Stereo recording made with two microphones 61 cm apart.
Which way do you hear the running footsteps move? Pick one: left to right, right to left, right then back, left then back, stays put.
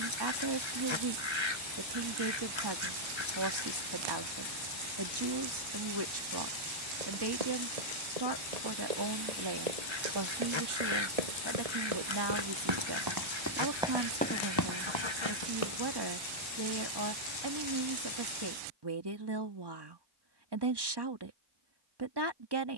right to left.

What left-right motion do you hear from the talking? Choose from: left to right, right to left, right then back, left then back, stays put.
stays put.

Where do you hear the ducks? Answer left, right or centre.
left.